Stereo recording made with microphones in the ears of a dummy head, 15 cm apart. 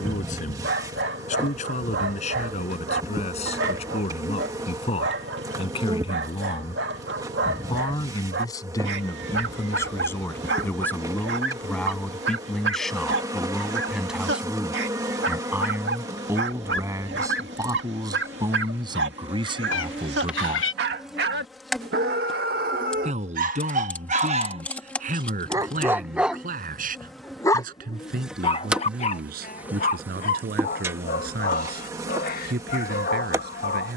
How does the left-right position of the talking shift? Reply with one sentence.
In this clip you hear the talking move to the right.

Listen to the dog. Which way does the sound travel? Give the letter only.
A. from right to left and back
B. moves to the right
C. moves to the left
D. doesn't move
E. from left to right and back
C.